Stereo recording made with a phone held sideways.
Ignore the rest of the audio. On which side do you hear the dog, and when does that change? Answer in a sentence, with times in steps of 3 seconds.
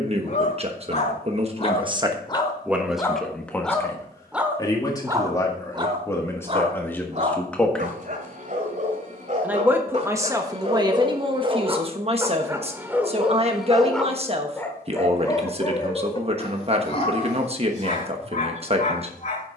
In this clip you hear the dog on the left from 0 s, in the centre from 3 s, on the right from 6 s, in the centre from 12 s and on the left from 15 s.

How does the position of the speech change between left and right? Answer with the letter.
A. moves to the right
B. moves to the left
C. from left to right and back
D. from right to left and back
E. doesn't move
D.